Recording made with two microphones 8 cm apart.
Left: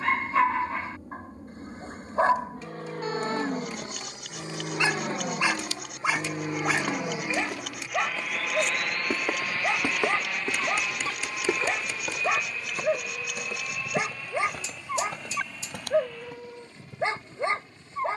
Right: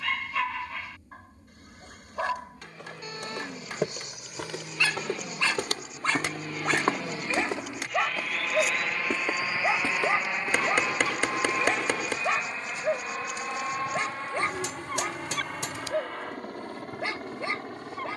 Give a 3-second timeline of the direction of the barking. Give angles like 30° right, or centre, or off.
30° left, 30° left, centre, centre, 10° left, 30° left.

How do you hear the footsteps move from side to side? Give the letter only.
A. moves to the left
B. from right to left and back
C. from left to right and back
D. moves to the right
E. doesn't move
A.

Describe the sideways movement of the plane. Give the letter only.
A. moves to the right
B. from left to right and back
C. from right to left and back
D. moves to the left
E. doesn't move
A.